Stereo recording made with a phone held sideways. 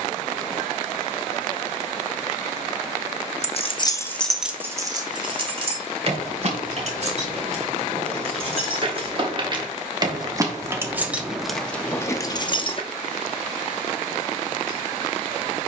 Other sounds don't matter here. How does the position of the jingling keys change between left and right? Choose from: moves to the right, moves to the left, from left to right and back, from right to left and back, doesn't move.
from left to right and back.